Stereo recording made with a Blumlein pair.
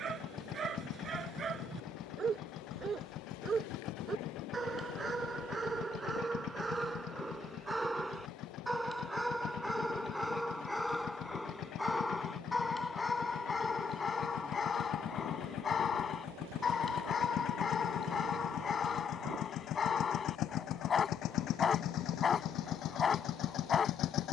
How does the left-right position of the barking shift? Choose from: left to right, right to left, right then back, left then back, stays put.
right to left.